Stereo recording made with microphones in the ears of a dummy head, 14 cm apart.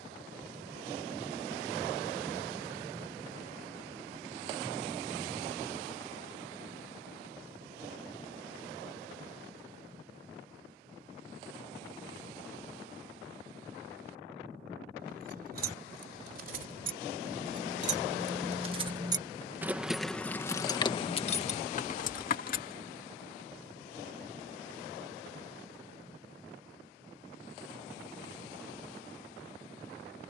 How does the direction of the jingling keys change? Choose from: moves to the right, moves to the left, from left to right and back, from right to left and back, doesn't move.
moves to the left.